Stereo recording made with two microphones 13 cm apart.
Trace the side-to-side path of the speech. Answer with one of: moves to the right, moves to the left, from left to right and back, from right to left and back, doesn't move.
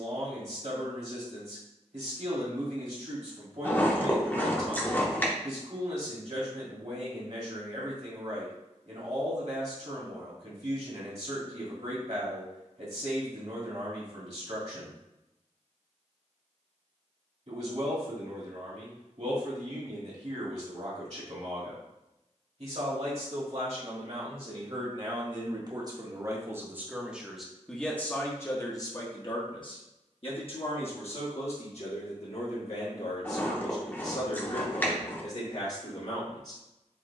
moves to the left.